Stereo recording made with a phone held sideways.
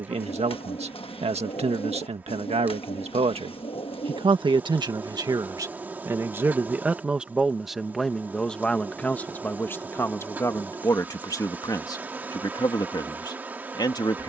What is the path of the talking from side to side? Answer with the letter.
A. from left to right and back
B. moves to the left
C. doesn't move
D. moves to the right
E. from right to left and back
B.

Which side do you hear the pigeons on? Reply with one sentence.
You can hear the pigeons on the left.